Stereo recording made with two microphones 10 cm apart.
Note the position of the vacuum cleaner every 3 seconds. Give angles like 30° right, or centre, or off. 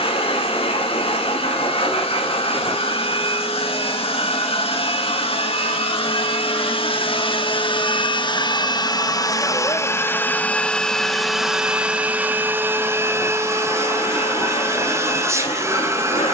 80° left, 80° left, 60° left, 20° left, 30° right, 30° right.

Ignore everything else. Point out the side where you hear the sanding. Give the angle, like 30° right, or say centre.
80° left.